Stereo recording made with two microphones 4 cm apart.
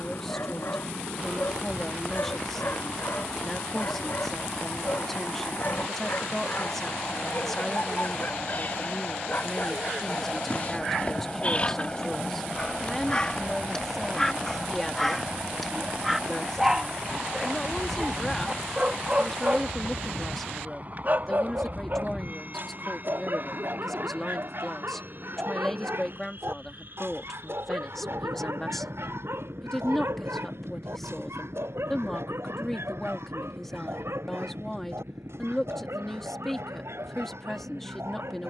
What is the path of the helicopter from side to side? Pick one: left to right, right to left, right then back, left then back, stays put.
left to right.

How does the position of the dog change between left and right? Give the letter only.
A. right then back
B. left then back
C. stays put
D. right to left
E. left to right
E.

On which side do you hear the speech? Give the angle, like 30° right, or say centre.
10° left.